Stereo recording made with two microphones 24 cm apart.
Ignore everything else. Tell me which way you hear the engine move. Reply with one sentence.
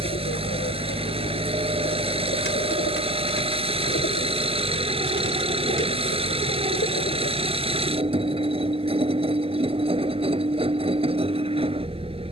You can hear the engine stay in one place.